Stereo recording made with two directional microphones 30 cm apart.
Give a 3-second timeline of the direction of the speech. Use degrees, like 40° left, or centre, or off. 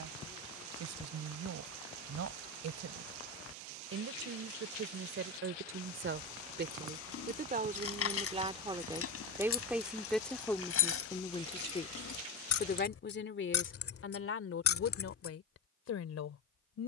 60° right, 50° right, 30° right, 10° left, 40° left, 50° left.